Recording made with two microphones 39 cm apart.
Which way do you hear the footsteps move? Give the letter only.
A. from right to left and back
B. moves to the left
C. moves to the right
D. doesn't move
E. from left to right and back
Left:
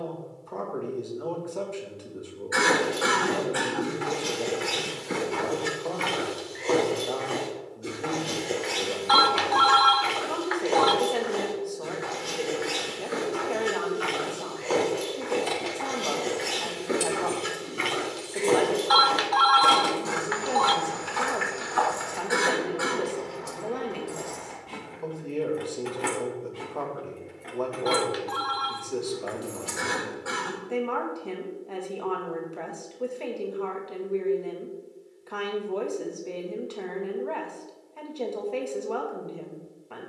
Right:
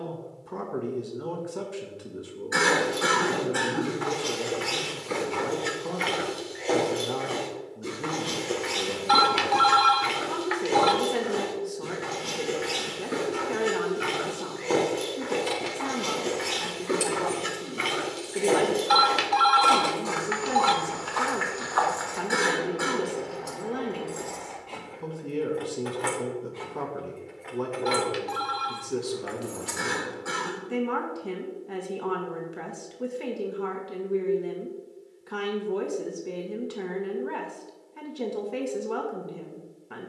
E.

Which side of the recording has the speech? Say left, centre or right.
right.